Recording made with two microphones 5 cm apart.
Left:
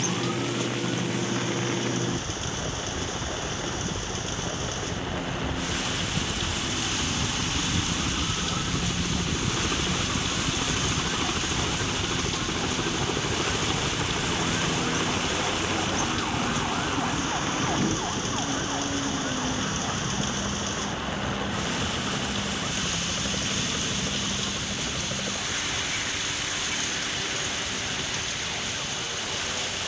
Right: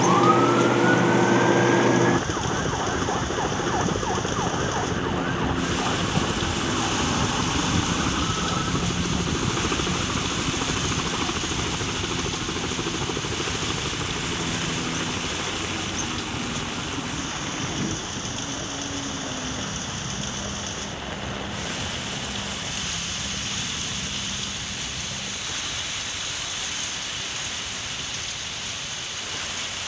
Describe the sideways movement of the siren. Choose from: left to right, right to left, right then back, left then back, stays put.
right to left.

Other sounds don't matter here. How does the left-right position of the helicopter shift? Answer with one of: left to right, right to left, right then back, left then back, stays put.
right to left.